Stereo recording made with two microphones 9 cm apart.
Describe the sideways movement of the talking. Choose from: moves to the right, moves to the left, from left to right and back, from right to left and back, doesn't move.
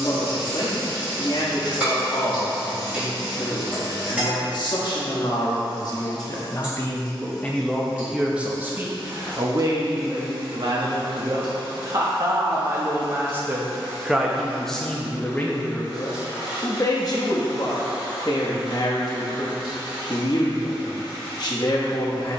from left to right and back.